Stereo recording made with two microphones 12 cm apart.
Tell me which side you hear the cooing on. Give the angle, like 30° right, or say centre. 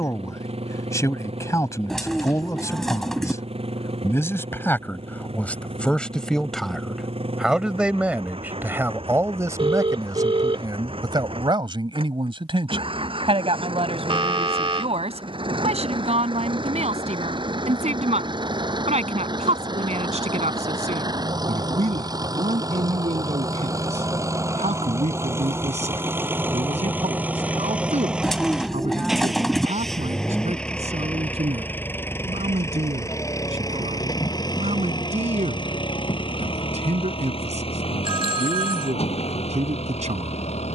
centre.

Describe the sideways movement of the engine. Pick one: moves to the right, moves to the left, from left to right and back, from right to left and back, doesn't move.
moves to the left.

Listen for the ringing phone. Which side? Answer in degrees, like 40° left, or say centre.
50° right.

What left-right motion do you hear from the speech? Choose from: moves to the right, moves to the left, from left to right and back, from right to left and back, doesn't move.
moves to the right.